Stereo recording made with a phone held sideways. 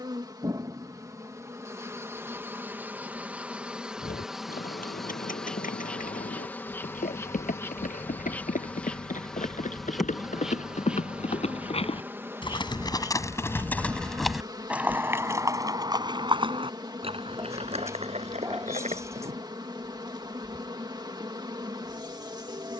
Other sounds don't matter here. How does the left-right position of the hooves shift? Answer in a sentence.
You can hear the hooves travel towards the right.